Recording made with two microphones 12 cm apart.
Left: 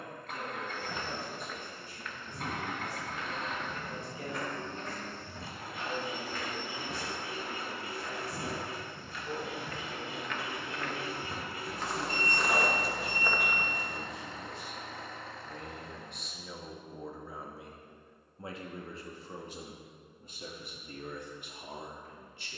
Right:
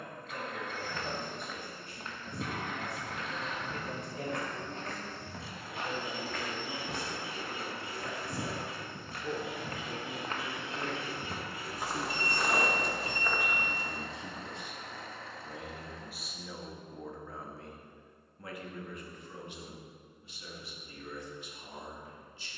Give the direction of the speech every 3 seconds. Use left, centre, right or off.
right, right, right, right, right, centre, left, left.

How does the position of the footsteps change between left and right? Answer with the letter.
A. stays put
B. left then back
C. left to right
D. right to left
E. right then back
E.